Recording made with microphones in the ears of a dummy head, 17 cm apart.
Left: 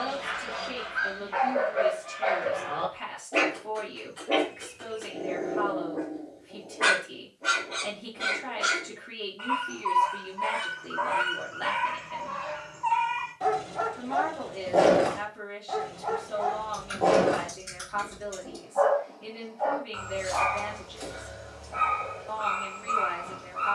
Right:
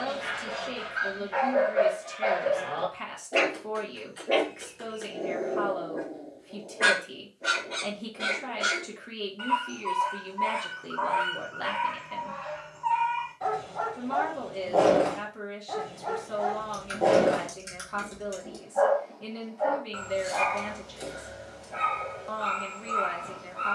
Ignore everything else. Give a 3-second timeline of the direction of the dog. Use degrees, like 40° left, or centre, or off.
20° right, 20° right, 20° right, 10° left, 30° left, 10° right, 10° right, 10° right.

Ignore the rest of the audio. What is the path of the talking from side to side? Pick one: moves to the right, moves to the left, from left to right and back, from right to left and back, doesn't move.
doesn't move.